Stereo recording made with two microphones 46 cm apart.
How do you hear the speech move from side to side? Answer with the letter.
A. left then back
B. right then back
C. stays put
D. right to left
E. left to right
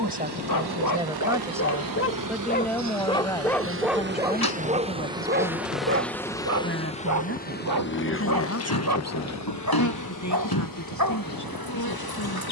D.